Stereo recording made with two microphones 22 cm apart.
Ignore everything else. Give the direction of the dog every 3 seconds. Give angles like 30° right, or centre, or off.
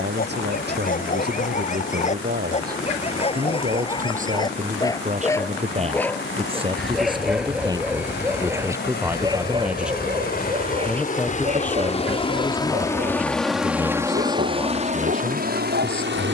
40° left, 20° left, centre, 30° right, 40° right, 50° right.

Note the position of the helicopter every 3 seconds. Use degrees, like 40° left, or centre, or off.
70° left, 70° left, 60° left, 40° left, centre, 50° right.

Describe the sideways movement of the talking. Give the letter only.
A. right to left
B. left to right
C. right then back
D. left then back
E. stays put
A.